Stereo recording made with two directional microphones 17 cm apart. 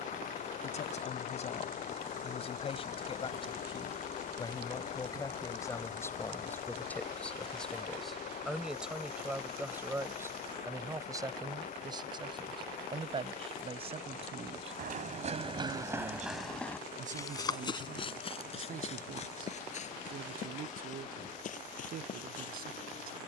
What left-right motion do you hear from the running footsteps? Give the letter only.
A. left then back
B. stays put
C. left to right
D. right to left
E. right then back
D.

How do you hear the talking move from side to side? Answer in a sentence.
In this clip you hear the talking move to the right.